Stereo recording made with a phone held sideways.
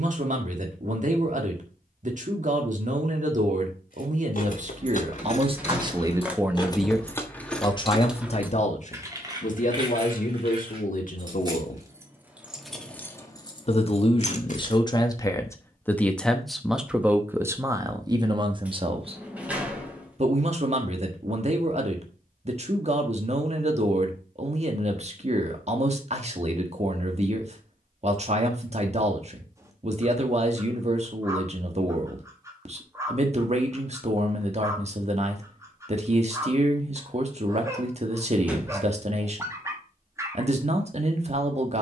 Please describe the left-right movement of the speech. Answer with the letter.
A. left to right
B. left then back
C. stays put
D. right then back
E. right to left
B.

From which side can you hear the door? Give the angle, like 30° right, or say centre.
10° right.